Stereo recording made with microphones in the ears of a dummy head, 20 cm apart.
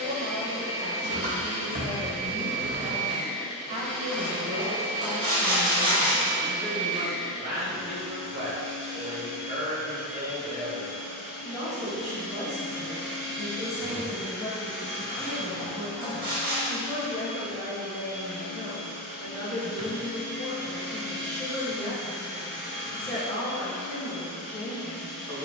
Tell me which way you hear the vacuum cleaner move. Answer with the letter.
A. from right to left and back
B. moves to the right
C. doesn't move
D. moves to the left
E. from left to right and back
C.